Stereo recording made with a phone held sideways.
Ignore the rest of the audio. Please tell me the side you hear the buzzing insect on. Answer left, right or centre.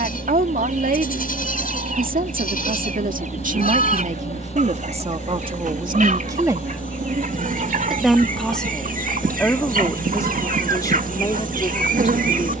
right.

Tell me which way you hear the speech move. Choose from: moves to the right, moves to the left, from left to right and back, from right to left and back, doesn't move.
moves to the left.